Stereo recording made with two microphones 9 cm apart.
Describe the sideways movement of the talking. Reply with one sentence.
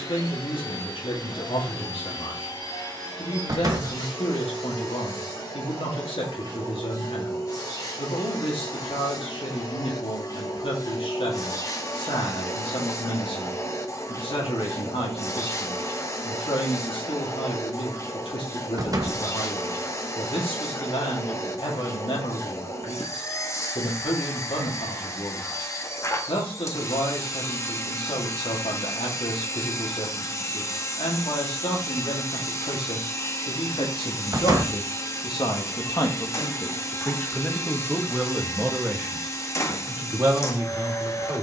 You can hear the talking travel towards the right.